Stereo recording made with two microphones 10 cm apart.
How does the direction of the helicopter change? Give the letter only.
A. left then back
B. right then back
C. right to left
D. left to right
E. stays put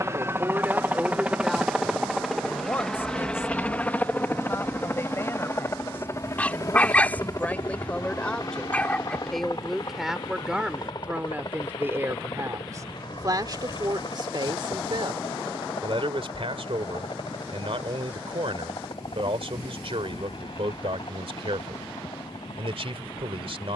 C.